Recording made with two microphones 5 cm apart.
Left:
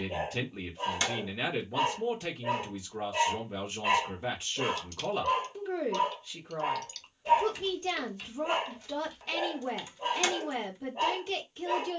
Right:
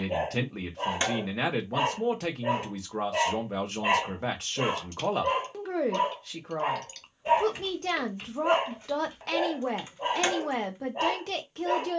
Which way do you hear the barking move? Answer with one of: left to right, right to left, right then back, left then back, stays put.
stays put.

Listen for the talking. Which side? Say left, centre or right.
right.